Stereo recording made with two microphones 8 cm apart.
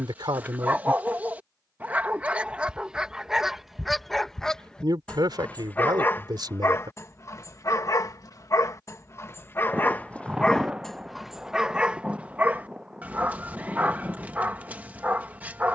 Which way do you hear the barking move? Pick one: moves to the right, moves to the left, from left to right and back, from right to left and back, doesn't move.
from right to left and back.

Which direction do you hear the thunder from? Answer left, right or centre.
centre.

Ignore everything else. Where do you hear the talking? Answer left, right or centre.
right.